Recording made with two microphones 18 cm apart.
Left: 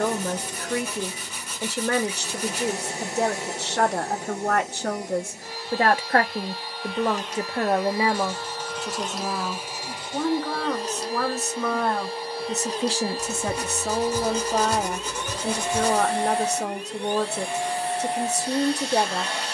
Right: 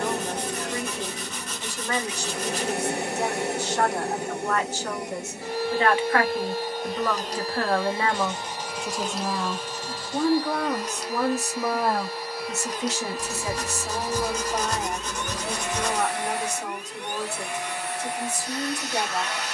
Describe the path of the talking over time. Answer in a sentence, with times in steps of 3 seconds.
In this clip you hear the talking on the left from 0 s, in the centre from 9 s and on the left from 12 s.